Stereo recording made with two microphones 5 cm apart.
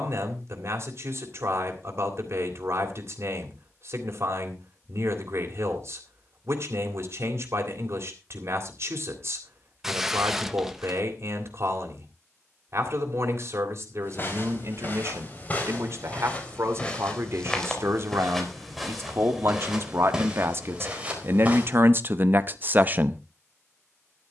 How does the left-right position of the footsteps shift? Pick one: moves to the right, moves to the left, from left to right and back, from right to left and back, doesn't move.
moves to the right.